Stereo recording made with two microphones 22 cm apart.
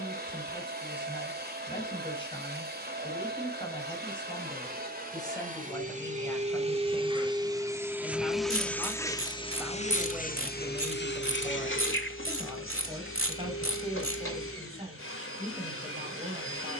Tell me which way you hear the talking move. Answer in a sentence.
In this clip you hear the talking travel towards the right.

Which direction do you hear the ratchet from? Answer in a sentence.
In this clip you hear the ratchet on the right.